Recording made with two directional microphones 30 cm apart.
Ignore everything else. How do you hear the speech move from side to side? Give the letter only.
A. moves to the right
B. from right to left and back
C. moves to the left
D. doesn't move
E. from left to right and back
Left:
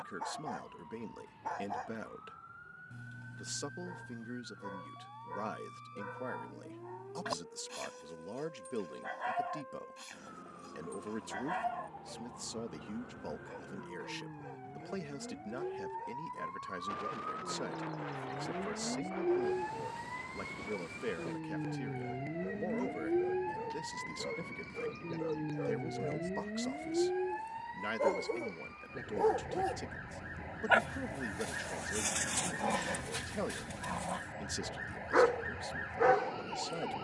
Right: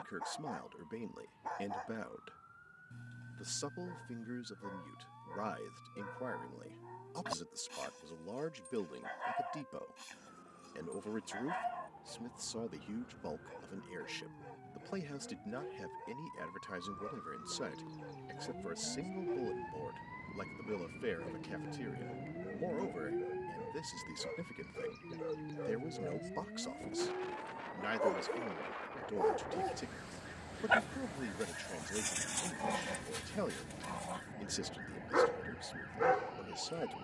D.